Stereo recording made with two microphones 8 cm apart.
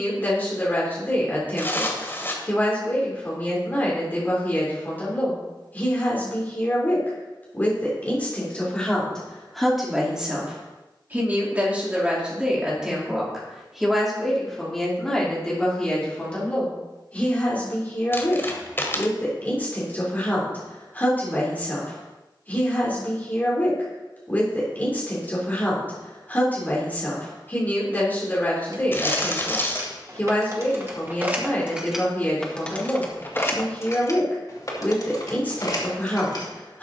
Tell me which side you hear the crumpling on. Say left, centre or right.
left.